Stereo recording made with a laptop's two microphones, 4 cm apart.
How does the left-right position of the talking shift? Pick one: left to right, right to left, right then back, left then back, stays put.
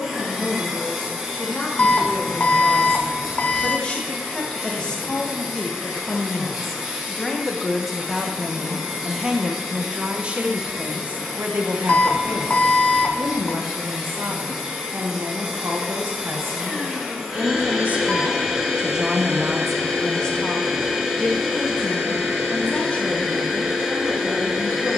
right then back.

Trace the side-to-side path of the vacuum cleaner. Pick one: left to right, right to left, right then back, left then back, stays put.
stays put.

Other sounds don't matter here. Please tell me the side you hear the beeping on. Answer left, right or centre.
left.